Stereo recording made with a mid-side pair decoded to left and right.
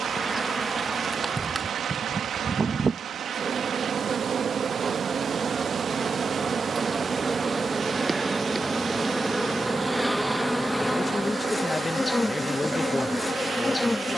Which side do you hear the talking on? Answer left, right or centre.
left.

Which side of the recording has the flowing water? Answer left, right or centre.
right.